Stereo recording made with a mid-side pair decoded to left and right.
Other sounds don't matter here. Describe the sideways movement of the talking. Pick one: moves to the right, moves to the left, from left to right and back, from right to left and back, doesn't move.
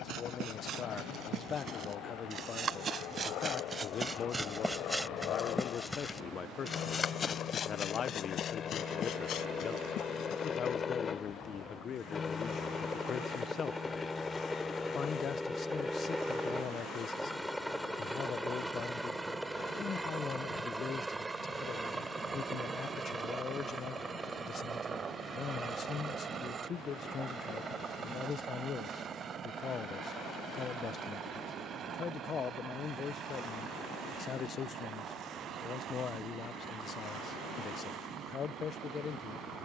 doesn't move.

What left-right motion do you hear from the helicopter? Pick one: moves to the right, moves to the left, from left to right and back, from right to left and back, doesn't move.
moves to the right.